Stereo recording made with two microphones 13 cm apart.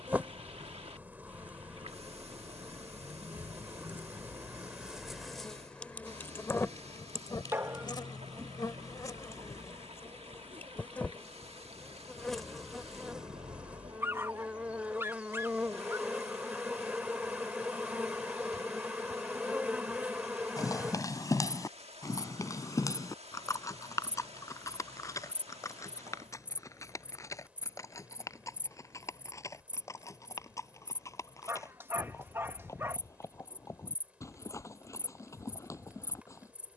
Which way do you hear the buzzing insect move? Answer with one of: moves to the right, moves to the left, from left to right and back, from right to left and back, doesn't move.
from right to left and back.